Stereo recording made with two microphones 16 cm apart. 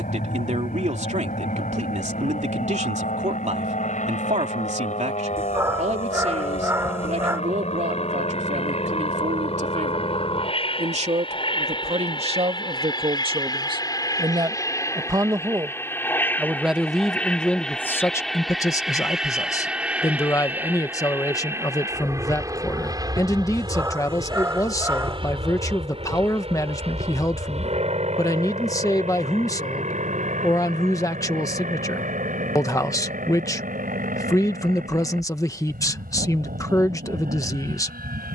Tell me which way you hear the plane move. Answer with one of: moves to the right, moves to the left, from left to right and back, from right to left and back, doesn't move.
moves to the right.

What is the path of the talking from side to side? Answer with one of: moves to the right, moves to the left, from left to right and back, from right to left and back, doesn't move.
moves to the left.